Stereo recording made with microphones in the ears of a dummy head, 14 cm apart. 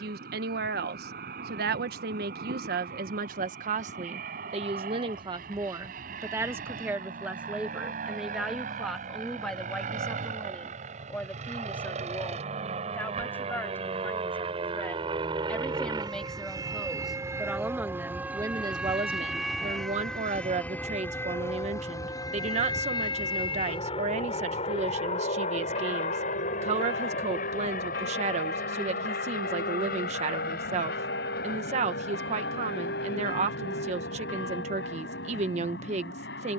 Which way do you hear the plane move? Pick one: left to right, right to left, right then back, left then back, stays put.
right to left.